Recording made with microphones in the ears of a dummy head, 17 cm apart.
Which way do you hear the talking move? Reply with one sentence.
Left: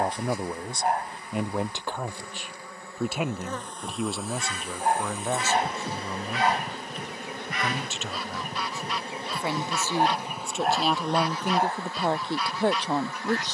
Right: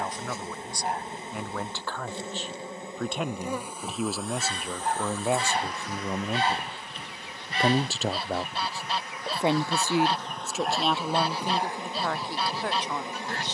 In this clip you hear the talking go right and come back.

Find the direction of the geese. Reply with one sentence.
You can hear the geese on the right.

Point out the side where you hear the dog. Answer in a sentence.
You can hear the dog on the left.